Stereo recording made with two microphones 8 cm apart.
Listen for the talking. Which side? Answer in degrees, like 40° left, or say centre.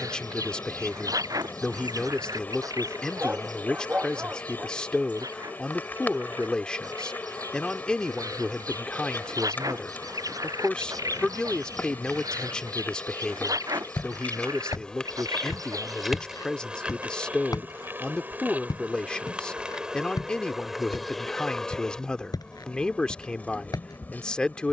10° left.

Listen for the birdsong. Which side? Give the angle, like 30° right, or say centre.
50° right.